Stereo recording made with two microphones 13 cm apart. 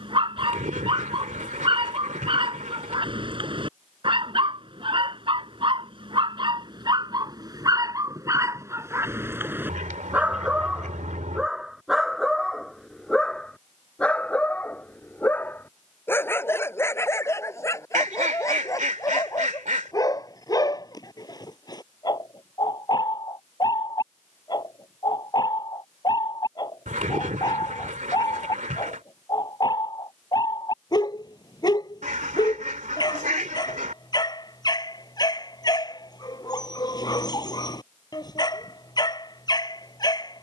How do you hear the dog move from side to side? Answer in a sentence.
You can hear the dog travel towards the left.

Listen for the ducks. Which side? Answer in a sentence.
In this clip you hear the ducks on the right.